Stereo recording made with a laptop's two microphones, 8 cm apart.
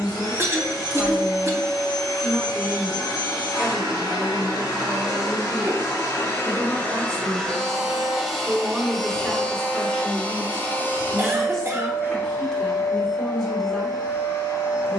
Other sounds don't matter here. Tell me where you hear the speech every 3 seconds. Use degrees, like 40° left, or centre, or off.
centre, 40° right, 30° right, centre, 10° left.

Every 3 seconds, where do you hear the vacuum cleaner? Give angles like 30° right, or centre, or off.
60° left, 50° left, 10° left, 20° left, 40° left.